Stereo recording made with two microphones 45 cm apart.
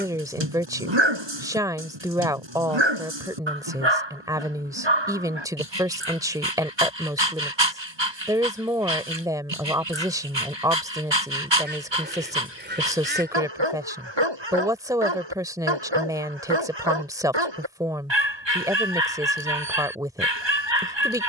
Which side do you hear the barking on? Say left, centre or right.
right.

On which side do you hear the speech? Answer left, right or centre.
centre.